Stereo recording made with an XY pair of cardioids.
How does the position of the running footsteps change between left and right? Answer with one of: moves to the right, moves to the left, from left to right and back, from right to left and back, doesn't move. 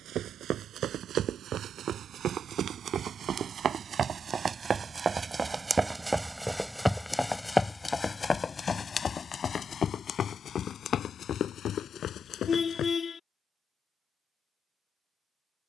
moves to the left.